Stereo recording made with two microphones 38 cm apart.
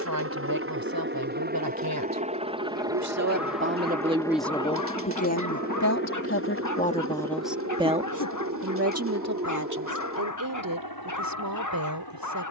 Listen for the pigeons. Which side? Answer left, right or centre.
right.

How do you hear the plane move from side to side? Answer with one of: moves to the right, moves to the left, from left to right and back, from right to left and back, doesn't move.
moves to the left.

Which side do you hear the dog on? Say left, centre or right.
left.